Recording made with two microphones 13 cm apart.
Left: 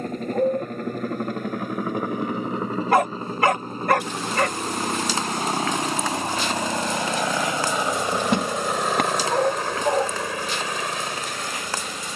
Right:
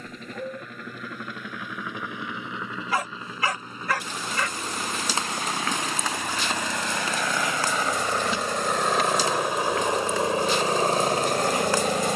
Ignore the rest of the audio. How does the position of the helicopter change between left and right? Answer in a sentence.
In this clip you hear the helicopter travel towards the right.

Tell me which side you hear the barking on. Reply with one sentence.
You can hear the barking on the left.